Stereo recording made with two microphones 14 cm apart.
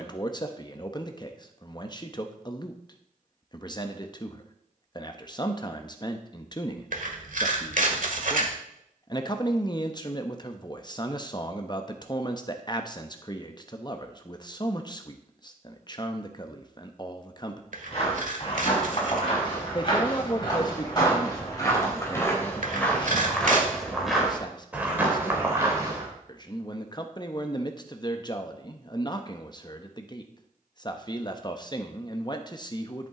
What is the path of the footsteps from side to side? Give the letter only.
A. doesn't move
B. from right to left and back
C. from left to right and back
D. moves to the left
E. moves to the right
E.